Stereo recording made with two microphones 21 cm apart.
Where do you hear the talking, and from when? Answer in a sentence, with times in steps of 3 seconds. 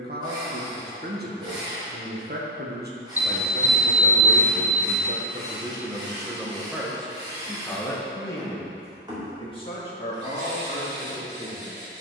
In this clip you hear the talking on the right from 0 s, in the centre from 6 s and on the left from 9 s.